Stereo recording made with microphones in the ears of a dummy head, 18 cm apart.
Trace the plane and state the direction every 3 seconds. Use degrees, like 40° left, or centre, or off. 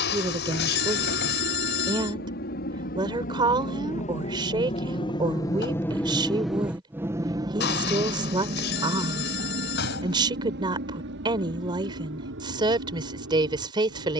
60° left, 30° left, 20° right, 50° right, 60° right.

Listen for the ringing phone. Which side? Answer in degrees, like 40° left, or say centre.
60° left.